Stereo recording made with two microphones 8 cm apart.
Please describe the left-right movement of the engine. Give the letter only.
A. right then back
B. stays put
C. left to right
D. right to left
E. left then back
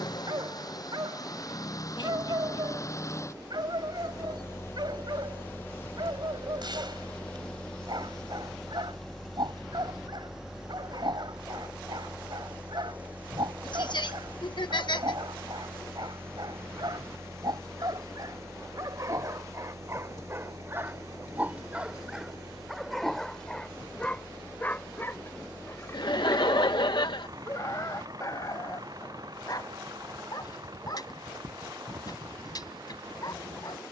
C.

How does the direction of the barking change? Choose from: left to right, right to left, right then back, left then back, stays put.
right to left.